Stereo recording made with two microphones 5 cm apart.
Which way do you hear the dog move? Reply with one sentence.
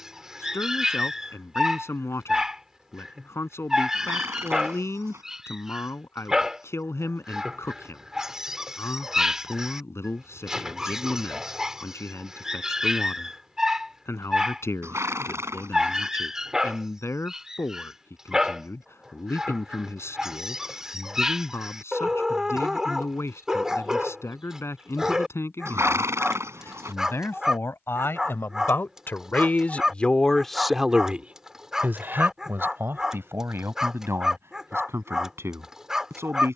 In this clip you hear the dog stay in one place.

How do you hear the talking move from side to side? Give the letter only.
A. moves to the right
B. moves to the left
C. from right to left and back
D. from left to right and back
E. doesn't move
A.